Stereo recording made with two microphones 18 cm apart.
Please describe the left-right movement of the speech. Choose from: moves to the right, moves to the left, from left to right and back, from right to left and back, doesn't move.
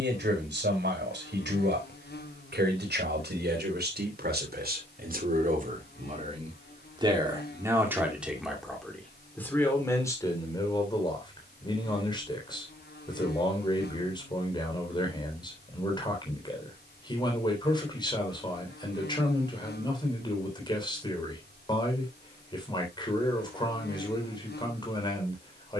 moves to the left.